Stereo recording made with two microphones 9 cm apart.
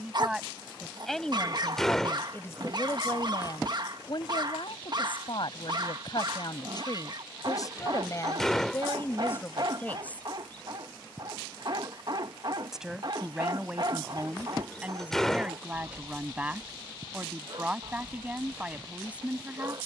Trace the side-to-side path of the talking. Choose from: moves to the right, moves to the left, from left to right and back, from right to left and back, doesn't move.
from right to left and back.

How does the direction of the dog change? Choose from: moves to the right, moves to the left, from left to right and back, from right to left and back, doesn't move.
doesn't move.